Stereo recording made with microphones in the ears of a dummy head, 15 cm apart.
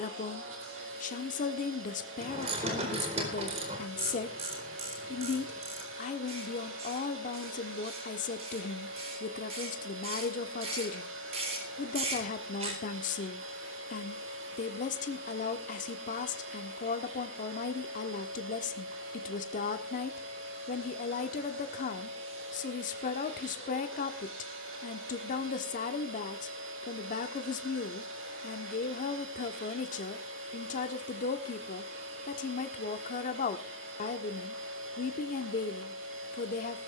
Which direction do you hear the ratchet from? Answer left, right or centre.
right.